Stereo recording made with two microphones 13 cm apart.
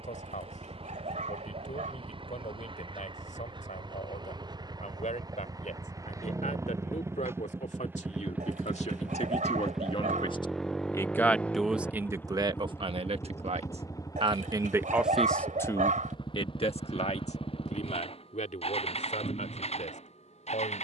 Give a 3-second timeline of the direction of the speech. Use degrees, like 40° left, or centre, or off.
70° left, 70° left, 60° left, 30° left, 40° right, 40° left, 70° left.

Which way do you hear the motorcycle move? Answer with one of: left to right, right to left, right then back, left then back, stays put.
right to left.